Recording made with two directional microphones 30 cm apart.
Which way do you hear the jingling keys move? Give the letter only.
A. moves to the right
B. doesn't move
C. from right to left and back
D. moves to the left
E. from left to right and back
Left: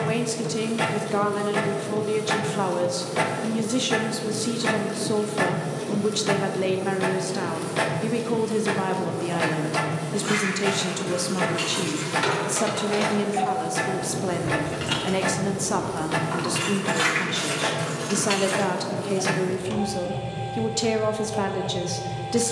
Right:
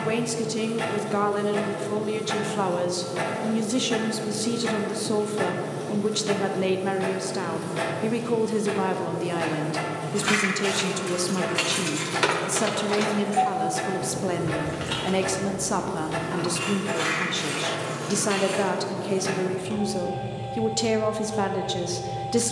D.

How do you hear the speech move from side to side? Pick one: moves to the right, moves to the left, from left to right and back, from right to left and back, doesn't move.
doesn't move.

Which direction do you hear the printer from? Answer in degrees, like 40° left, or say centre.
30° left.